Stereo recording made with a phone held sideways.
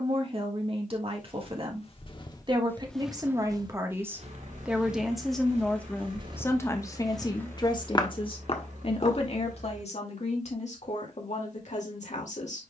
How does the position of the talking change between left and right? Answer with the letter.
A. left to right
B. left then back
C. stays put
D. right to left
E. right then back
D.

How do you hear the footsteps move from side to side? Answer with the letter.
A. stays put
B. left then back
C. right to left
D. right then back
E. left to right
D.